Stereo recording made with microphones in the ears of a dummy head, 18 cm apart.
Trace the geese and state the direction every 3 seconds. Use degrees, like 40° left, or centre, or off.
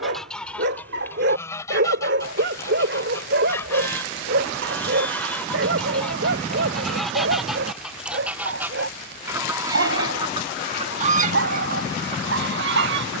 10° left, 10° left, centre, 30° right, 60° right.